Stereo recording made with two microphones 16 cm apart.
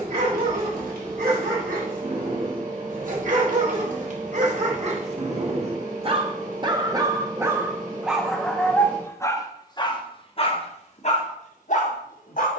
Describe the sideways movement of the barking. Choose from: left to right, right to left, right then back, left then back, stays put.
right to left.